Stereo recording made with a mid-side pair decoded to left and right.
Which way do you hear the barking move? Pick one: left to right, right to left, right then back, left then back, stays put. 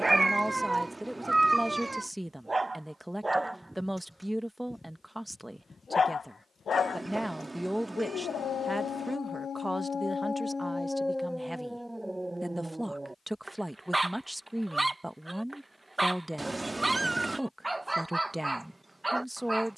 left then back.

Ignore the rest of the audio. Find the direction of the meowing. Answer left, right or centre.
right.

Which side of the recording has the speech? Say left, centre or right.
centre.